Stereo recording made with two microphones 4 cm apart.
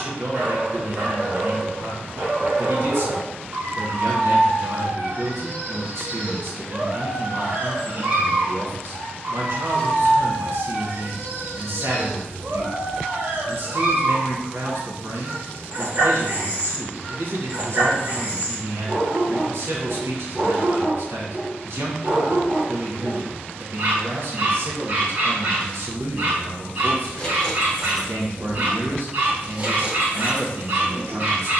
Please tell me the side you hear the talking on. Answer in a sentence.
You can hear the talking on the right.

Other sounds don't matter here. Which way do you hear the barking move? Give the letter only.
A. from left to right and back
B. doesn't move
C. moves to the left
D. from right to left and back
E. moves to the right
B.